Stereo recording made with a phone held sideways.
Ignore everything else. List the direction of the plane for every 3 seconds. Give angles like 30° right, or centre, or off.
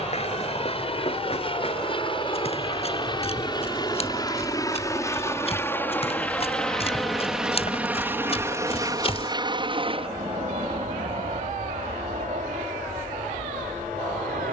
40° left, 30° left, 10° right, 40° right, 60° right.